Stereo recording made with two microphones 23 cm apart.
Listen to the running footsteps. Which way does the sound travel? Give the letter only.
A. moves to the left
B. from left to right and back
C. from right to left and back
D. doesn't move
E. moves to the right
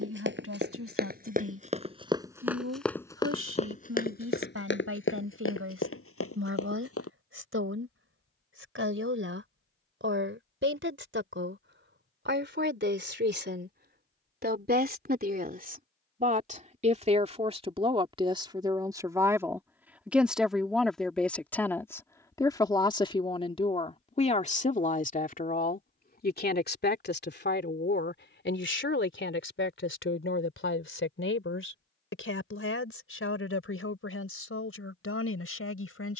A.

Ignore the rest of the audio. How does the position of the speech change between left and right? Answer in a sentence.
You can hear the speech move to the left.